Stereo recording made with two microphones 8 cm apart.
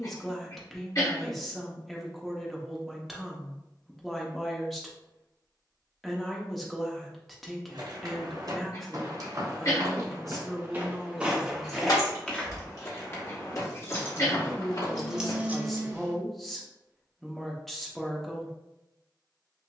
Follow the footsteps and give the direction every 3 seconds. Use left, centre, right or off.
off, off, right, right, left, left, off.